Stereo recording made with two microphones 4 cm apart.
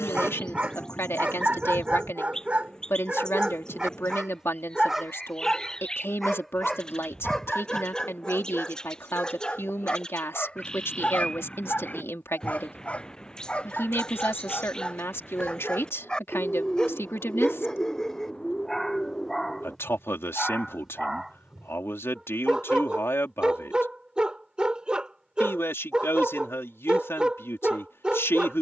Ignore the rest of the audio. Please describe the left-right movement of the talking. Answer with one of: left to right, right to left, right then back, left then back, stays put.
stays put.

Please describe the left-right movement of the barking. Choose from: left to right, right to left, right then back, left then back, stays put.
left then back.